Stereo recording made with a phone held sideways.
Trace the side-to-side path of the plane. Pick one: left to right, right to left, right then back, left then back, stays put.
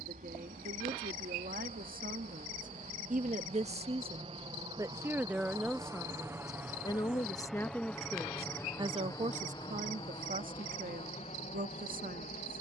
right to left.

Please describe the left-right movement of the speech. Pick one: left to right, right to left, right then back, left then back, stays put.
left then back.